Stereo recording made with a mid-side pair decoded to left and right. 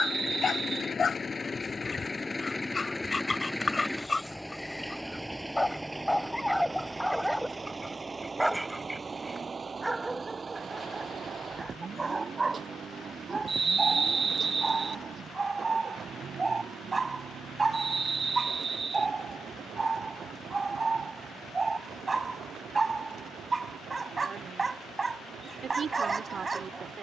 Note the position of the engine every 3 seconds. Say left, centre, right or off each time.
left, centre, right, right, right, right, right, right, right.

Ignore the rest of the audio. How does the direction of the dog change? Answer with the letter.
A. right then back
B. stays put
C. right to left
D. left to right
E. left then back
D.